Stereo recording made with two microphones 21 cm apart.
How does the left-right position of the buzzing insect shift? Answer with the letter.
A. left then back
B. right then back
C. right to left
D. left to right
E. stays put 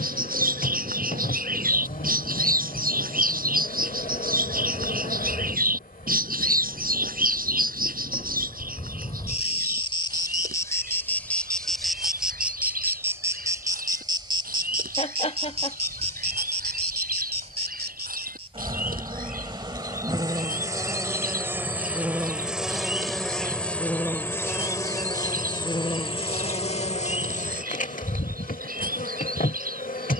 B.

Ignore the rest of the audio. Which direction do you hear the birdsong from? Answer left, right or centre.
right.